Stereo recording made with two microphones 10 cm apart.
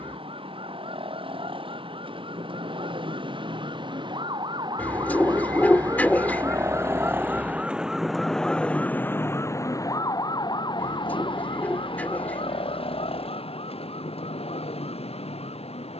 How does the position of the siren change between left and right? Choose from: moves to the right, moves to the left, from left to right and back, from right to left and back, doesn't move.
moves to the left.